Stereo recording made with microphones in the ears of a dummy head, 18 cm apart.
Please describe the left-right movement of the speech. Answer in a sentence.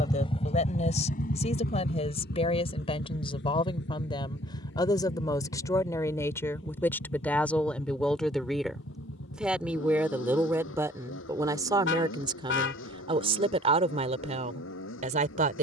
You can hear the speech go from the left side to the right.